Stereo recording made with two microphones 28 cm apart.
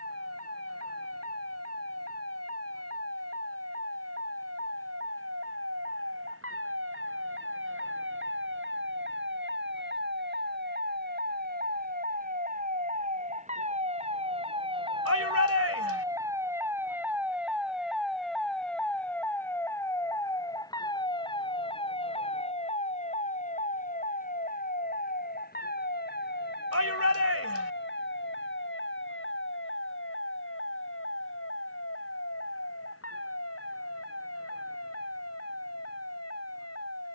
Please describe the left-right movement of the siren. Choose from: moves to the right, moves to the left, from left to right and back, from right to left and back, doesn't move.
moves to the left.